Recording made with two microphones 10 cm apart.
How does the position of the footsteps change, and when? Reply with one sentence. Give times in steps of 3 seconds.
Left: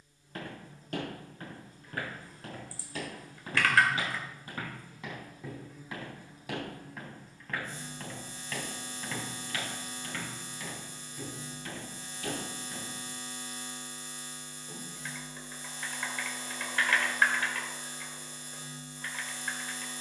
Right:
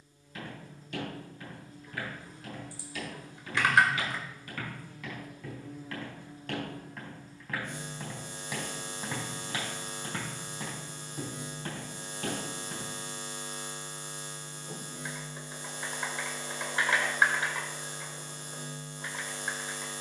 You can hear the footsteps on the left from 0 s, in the centre from 6 s, on the right from 9 s and not at all from 15 s.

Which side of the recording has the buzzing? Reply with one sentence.
In this clip you hear the buzzing on the right.